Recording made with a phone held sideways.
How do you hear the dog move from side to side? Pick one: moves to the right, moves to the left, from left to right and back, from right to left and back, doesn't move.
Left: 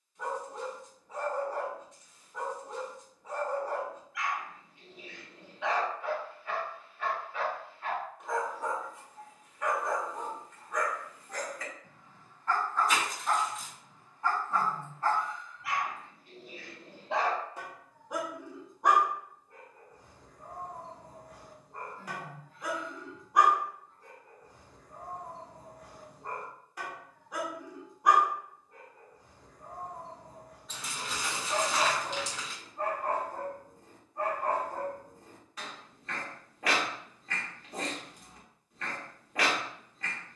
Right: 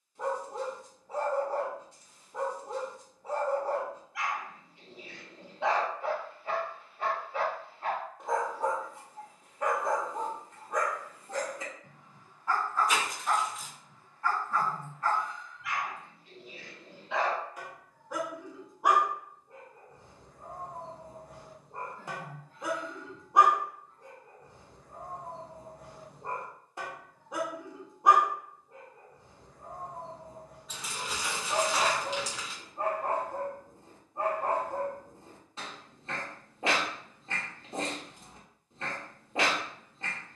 from right to left and back.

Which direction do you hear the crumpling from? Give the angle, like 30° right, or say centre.
centre.